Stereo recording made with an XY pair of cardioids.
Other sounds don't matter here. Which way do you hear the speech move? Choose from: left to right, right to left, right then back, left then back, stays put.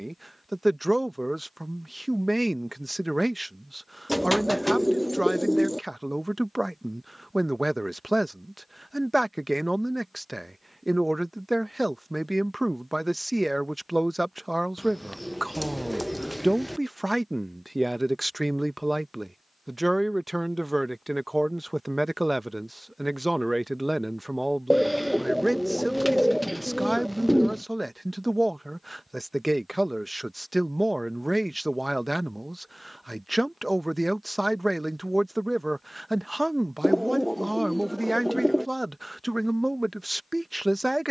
stays put.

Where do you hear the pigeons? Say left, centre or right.
centre.